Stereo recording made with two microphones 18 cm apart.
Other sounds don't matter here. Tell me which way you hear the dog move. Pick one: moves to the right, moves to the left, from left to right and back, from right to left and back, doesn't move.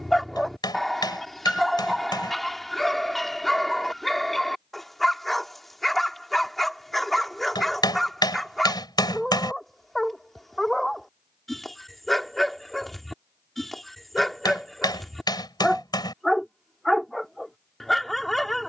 doesn't move.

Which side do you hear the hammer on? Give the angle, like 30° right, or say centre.
20° left.